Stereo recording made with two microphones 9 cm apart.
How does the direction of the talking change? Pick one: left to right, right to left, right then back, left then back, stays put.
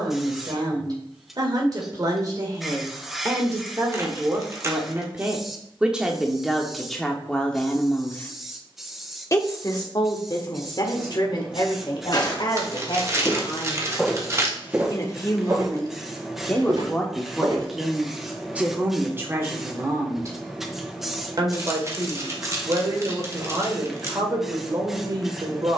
left then back.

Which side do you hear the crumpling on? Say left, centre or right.
right.